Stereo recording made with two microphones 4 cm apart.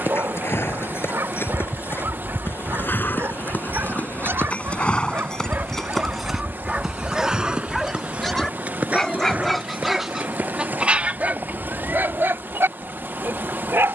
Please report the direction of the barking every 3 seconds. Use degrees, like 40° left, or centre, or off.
80° right, 60° right, 10° right, 20° right, 70° right.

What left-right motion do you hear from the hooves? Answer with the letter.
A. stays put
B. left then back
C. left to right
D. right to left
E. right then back
C.